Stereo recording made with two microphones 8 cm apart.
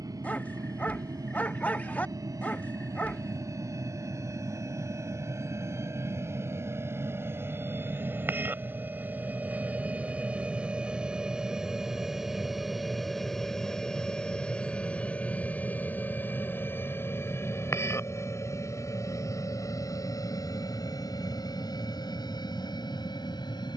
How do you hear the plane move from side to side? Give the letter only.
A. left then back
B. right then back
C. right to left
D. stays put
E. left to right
C.